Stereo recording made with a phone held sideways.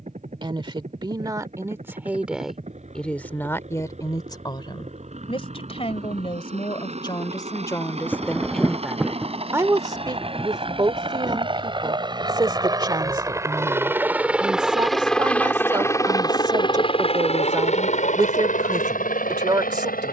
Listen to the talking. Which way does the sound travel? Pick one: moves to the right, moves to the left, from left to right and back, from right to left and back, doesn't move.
from right to left and back.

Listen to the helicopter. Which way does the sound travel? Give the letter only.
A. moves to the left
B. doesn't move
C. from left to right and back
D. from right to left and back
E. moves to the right
A.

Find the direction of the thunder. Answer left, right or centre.
centre.